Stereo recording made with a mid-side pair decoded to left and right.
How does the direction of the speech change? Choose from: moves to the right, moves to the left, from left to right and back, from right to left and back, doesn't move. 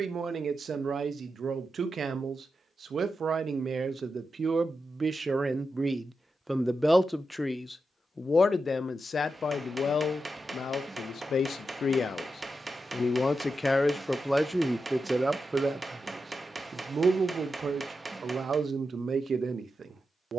from right to left and back.